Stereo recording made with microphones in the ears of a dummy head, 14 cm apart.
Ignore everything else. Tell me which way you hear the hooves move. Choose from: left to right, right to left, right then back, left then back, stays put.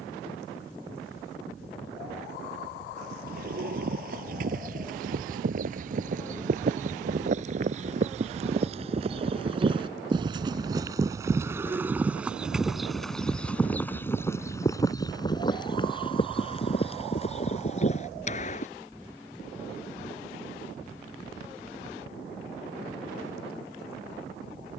right to left.